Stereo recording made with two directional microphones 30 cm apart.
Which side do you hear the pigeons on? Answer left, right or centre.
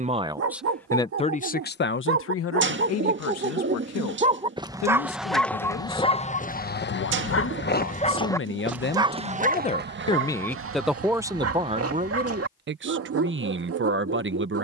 right.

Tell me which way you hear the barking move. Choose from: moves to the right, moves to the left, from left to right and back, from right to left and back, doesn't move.
from right to left and back.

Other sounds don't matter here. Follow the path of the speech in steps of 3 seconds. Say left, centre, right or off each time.
left, left, left, centre, right.